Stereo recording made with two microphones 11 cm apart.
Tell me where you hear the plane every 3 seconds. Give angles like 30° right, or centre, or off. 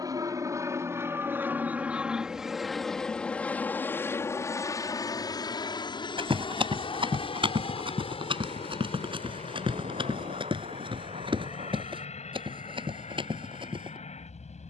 20° right, 20° left, 50° left, 60° left, 70° left.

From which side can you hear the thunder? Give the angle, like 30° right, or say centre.
80° right.